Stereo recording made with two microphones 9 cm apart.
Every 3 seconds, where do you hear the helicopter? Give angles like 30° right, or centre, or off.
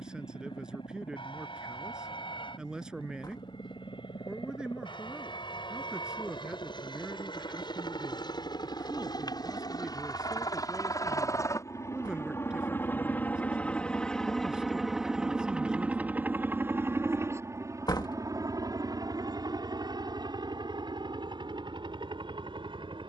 70° left, 70° left, 60° left, 40° left, 20° left, 20° right, 50° right, 60° right.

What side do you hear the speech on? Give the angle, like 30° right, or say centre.
10° right.